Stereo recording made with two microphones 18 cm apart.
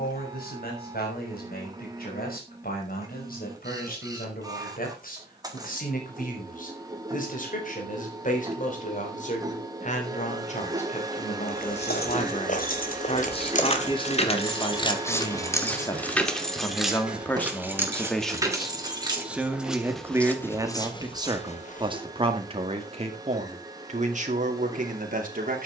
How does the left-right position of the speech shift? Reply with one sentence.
In this clip you hear the speech move from left to right.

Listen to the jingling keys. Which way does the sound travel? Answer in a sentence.
In this clip you hear the jingling keys travel towards the right.